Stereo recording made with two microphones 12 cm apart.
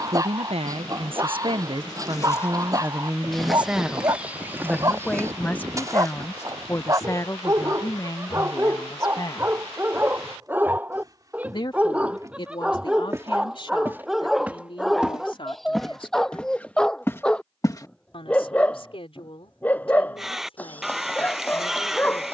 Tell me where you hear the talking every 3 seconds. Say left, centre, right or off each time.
right, centre, left, left, left, left, left, left.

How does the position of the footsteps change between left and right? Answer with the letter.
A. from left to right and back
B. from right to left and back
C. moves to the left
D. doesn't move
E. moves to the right
A.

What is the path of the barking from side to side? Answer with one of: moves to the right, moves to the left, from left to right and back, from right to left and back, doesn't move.
moves to the left.